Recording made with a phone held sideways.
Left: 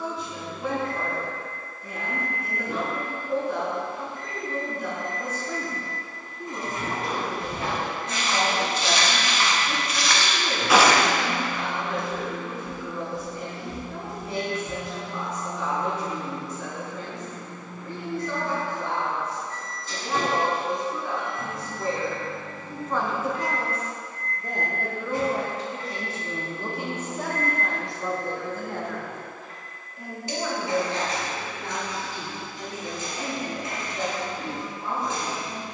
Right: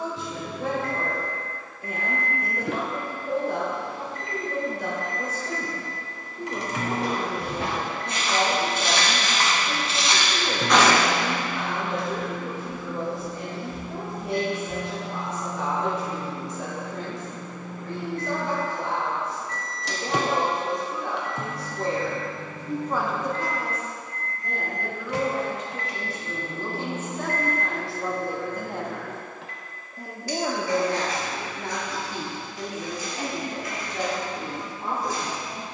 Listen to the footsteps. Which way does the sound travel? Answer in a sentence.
In this clip you hear the footsteps move to the left.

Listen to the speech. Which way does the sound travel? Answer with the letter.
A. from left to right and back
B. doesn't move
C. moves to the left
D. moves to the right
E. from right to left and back
E.